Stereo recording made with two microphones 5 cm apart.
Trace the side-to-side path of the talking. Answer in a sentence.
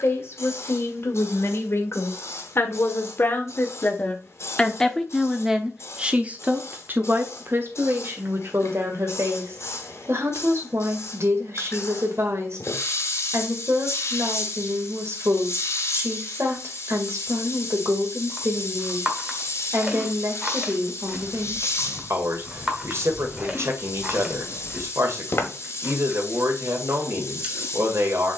In this clip you hear the talking travel towards the right.